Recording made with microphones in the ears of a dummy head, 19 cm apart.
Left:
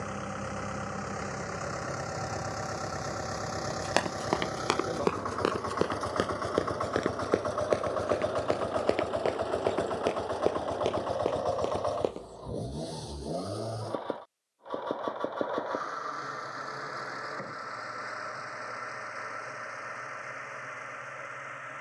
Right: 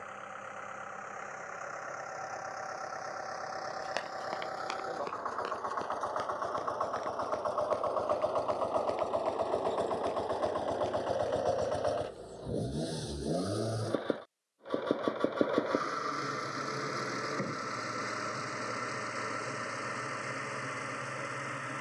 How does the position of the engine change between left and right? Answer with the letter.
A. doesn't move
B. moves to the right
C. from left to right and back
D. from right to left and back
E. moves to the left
B.